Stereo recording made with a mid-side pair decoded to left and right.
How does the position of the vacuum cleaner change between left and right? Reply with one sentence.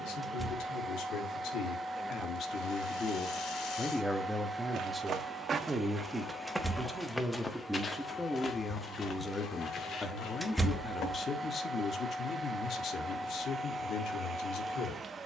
You can hear the vacuum cleaner move from right to left and back again.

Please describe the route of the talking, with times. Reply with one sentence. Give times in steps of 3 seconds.
You can hear the talking on the left from 0 s, in the centre from 3 s and on the left from 9 s.